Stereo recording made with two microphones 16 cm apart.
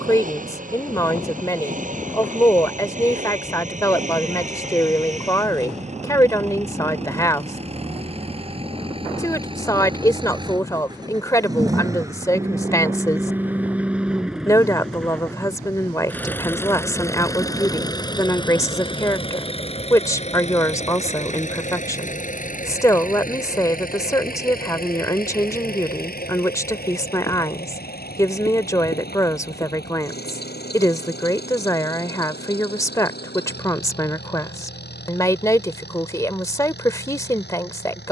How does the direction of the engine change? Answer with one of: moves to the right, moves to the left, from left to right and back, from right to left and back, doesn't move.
moves to the left.